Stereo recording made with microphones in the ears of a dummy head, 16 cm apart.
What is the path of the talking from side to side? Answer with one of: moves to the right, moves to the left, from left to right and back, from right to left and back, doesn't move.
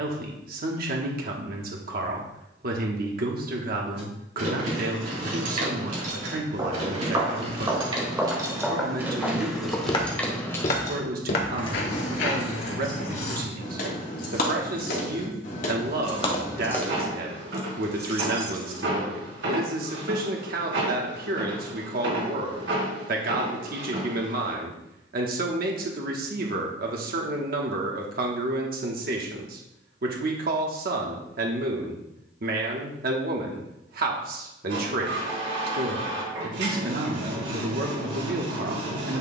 doesn't move.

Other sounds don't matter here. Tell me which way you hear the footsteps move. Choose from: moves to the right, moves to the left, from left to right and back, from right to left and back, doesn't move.
moves to the left.